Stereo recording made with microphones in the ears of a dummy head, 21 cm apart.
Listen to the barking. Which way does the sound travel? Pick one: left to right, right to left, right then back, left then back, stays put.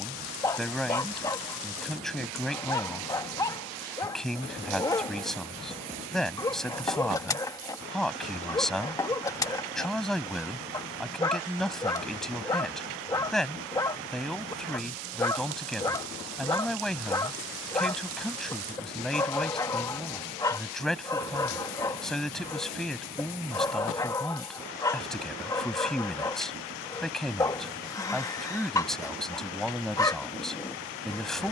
stays put.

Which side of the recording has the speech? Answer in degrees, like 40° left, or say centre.
centre.